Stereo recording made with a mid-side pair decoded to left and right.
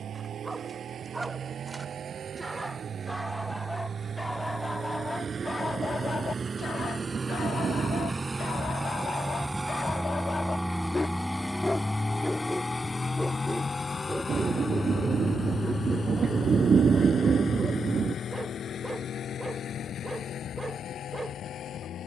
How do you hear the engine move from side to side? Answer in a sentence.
You can hear the engine travel towards the left.